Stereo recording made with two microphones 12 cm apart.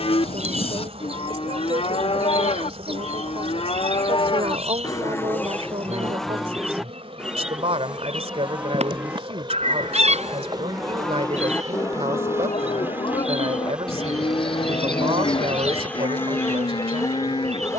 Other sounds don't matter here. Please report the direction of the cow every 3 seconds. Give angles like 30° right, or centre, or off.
60° left, 40° left, 10° right, centre, 50° left, 50° left.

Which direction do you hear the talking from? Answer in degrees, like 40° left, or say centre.
60° right.